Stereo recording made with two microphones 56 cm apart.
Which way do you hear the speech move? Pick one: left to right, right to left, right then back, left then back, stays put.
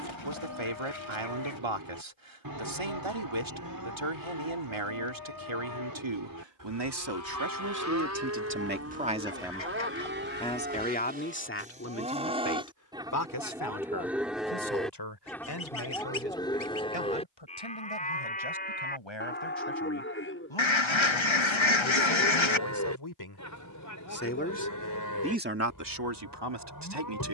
left then back.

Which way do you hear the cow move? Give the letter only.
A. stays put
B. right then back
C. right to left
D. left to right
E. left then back
C.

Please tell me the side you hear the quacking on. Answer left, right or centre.
left.